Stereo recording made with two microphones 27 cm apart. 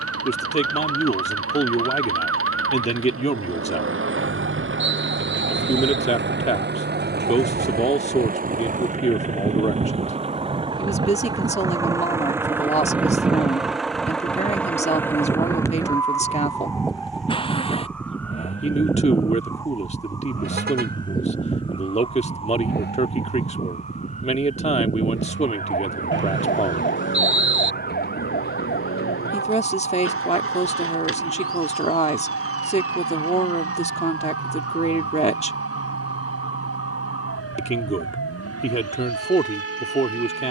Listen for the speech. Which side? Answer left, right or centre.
left.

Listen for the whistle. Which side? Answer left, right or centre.
right.